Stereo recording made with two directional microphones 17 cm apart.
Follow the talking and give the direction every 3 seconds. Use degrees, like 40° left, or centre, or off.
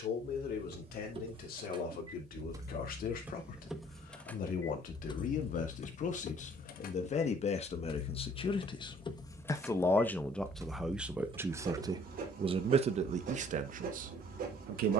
60° left, 50° left, 40° left, centre, 50° right.